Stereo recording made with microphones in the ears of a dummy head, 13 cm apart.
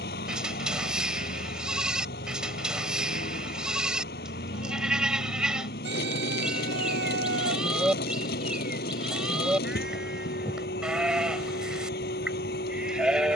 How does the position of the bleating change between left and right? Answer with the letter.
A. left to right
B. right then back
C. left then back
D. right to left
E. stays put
E.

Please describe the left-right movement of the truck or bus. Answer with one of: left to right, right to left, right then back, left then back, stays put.
stays put.